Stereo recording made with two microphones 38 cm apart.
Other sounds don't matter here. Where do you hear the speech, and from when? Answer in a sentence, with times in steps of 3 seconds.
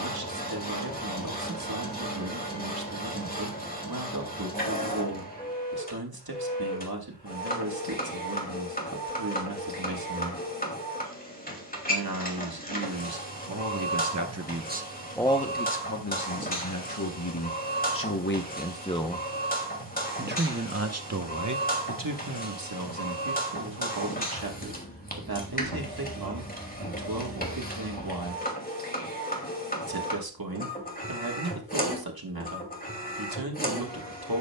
In this clip you hear the speech on the right from 0 s, on the left from 15 s, in the centre from 18 s and on the right from 21 s.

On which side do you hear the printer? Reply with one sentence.
In this clip you hear the printer on the left.